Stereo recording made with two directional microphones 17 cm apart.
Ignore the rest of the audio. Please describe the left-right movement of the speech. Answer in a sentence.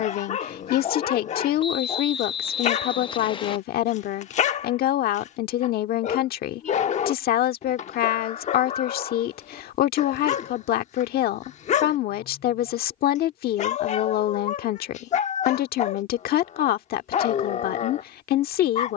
You can hear the speech stay in one place.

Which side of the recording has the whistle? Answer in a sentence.
You can hear the whistle on the left.